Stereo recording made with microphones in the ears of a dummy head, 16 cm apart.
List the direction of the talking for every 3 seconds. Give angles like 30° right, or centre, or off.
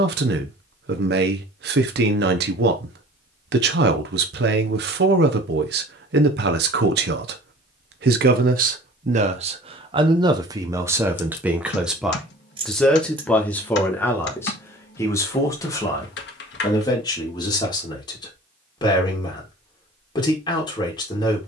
60° right, 60° right, 60° right, 20° right, 10° left, 20° left, 30° left.